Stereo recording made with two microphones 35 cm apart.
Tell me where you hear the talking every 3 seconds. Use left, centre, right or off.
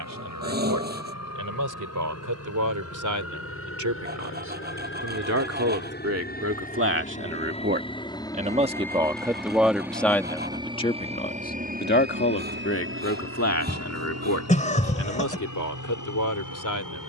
right, right, right, centre, left, left.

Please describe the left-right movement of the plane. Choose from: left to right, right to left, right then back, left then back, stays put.
left to right.